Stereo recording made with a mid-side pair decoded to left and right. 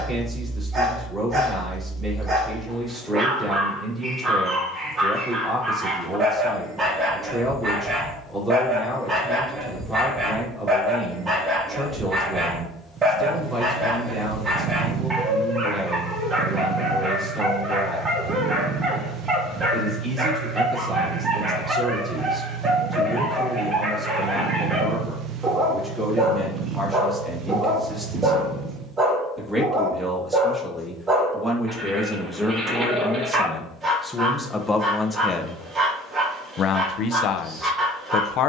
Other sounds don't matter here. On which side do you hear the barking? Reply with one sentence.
In this clip you hear the barking on the right.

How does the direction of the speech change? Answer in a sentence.
In this clip you hear the speech travel towards the left.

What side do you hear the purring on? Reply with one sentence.
You can hear the purring on the right.